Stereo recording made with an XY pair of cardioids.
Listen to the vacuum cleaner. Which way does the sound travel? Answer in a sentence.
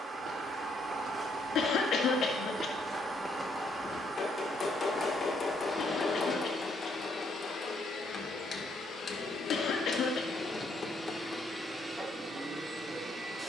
In this clip you hear the vacuum cleaner move from right to left and back again.